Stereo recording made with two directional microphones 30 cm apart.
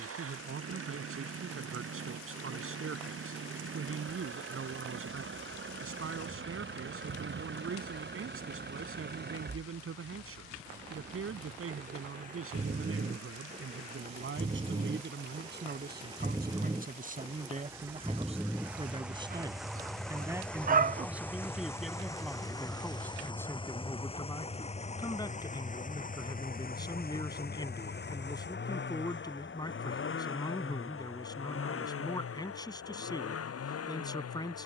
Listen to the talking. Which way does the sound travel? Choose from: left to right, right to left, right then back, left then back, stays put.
right to left.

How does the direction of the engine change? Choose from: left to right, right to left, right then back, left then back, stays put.
right to left.